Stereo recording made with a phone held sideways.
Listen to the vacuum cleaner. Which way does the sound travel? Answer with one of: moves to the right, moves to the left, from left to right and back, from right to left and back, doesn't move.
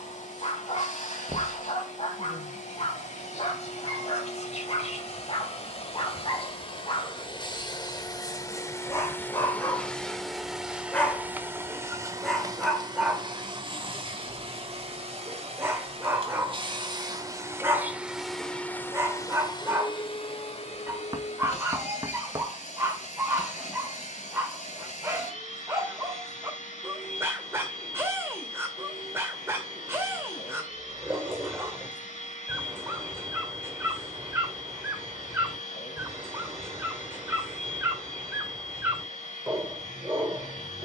from left to right and back.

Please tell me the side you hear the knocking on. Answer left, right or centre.
right.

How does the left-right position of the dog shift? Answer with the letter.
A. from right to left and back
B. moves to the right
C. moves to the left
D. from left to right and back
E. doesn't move
B.